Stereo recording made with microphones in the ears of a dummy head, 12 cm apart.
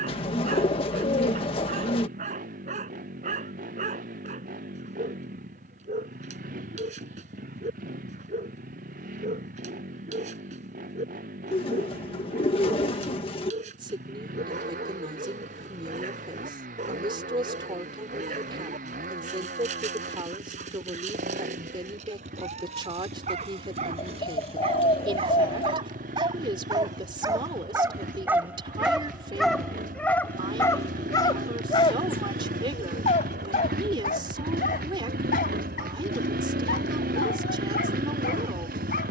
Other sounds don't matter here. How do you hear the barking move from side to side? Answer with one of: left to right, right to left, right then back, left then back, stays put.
right to left.